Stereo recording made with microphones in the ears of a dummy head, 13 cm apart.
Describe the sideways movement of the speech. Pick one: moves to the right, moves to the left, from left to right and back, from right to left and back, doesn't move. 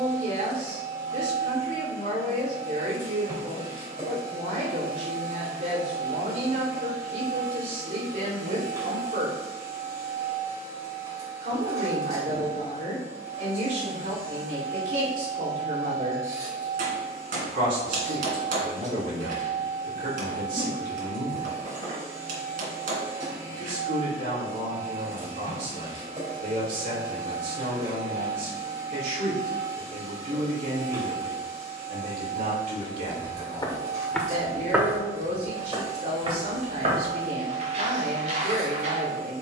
doesn't move.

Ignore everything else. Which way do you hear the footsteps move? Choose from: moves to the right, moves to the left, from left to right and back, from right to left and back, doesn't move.
moves to the right.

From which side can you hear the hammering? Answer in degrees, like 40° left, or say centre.
60° right.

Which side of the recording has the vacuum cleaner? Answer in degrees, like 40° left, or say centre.
20° right.